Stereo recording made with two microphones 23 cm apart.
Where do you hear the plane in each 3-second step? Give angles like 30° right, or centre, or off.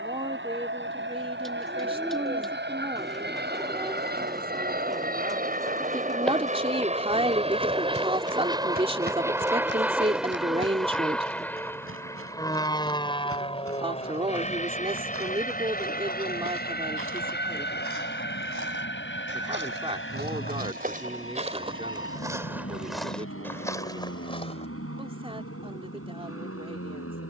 60° right, 40° right, 30° right, centre, 20° left, 40° left, 50° left, 60° left, 60° left.